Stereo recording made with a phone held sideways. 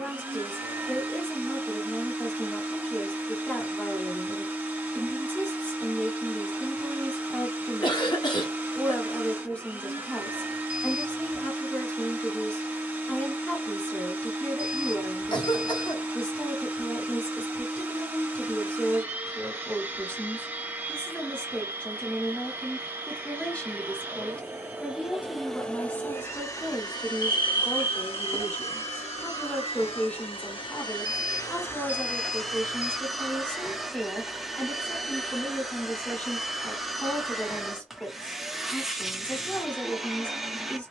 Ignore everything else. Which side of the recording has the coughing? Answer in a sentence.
In this clip you hear the coughing on the left.